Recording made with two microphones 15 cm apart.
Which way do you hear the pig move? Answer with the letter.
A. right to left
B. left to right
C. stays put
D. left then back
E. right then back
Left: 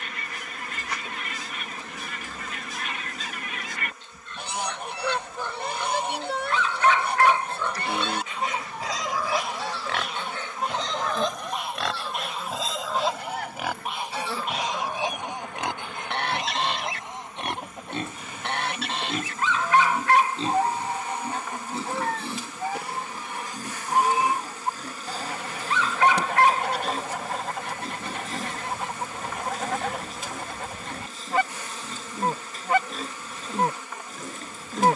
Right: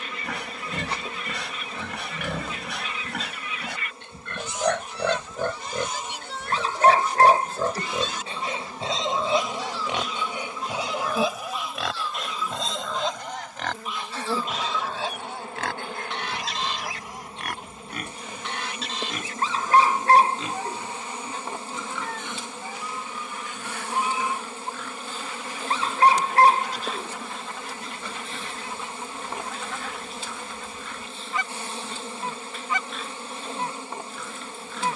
A.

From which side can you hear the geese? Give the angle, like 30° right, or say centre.
60° left.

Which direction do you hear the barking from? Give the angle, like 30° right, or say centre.
40° right.